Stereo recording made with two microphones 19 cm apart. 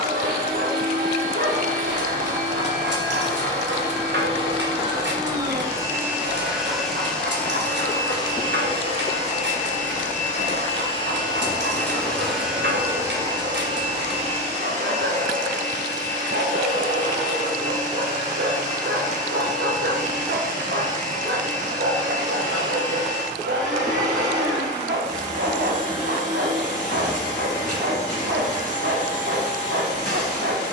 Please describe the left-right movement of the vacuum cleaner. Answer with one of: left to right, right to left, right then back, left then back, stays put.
left then back.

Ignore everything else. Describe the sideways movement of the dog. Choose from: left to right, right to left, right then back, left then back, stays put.
stays put.